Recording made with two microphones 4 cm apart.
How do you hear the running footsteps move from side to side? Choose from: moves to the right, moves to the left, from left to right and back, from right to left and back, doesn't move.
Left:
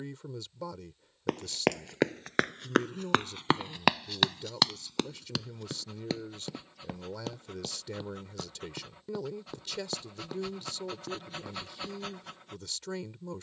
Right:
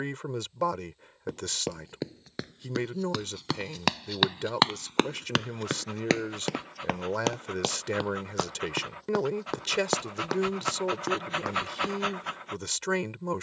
moves to the right.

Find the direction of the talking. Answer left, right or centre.
right.